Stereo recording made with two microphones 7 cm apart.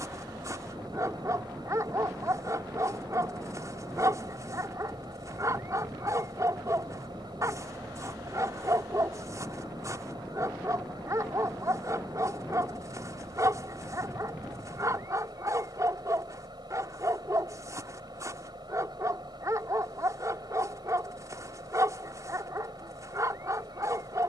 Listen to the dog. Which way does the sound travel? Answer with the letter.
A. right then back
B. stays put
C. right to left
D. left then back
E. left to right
B.